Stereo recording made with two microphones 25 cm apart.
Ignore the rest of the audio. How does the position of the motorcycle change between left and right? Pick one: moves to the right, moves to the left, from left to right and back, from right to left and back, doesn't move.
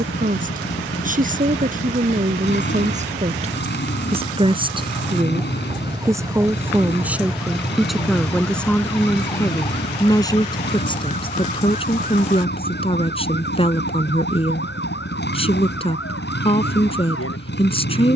doesn't move.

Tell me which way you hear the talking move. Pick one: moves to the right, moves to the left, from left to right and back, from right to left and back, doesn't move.
moves to the left.